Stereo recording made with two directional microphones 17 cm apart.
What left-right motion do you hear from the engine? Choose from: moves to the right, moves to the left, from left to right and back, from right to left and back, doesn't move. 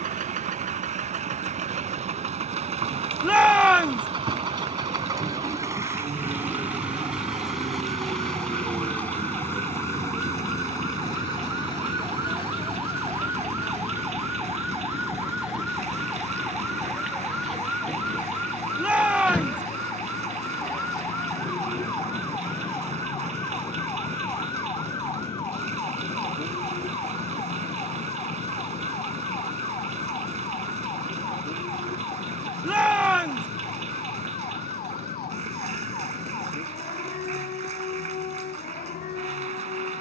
moves to the left.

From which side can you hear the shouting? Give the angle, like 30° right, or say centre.
10° right.